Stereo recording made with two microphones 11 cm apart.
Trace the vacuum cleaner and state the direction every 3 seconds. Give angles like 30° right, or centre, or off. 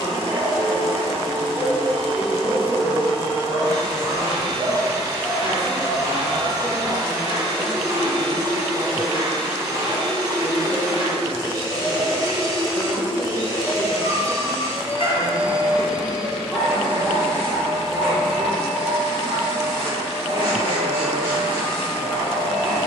30° right, 30° right, 30° right, 30° right, 30° right, centre, 20° right, 30° right.